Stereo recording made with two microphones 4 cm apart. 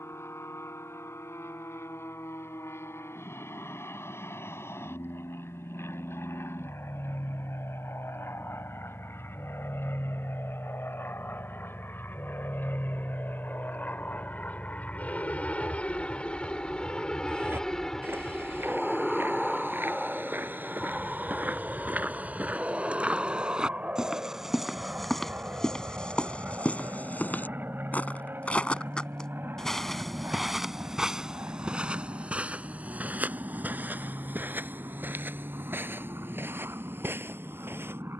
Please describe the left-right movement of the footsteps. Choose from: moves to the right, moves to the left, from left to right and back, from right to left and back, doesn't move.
from right to left and back.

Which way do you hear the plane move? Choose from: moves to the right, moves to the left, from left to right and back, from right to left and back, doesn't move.
moves to the right.